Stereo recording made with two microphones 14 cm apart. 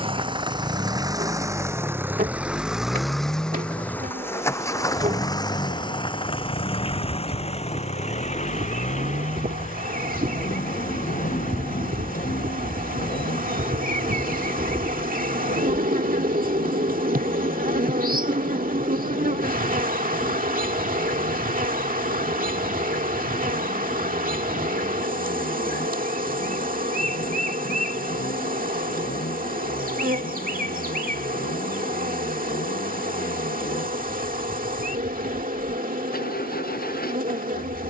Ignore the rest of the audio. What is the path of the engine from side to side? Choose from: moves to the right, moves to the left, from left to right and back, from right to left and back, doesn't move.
moves to the left.